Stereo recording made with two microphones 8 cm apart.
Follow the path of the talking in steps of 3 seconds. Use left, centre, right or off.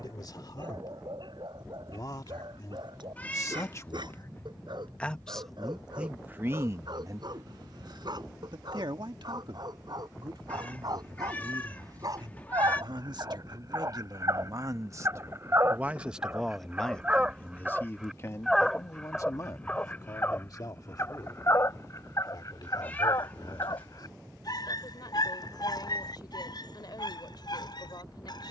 left, left, right, right, right, centre, left, left, left, left.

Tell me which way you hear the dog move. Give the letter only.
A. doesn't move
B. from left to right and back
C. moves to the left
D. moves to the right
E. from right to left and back
C.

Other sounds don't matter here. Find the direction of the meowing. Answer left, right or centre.
left.